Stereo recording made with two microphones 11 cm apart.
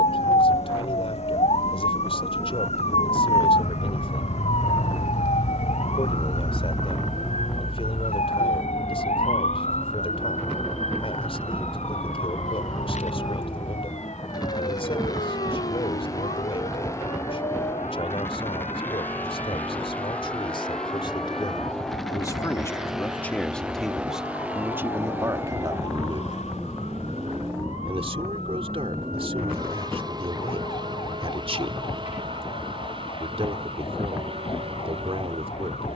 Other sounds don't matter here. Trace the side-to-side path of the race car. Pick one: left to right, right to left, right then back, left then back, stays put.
left to right.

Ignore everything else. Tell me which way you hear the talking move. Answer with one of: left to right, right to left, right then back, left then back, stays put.
left to right.